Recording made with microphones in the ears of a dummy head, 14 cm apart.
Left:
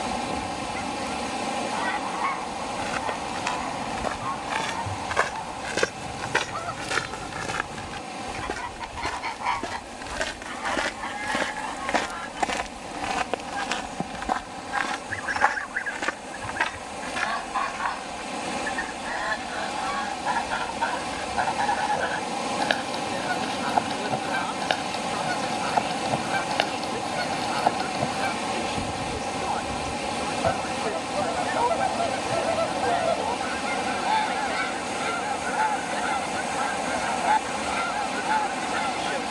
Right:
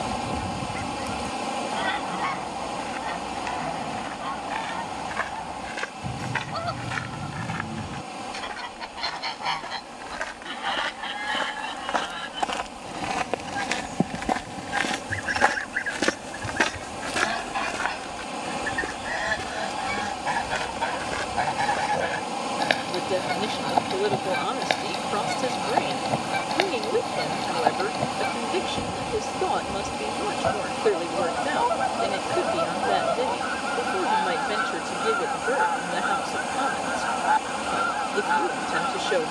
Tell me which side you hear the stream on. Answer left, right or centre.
centre.